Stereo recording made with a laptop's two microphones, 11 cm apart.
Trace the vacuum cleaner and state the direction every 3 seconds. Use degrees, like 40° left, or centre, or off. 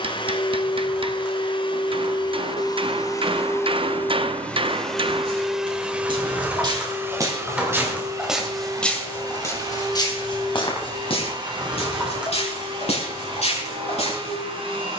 50° left, 10° left, 20° right, 40° right, 50° right.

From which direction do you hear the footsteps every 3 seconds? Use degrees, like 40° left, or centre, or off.
off, 50° right, 20° right, 40° left, 70° left.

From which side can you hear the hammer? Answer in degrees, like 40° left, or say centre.
50° right.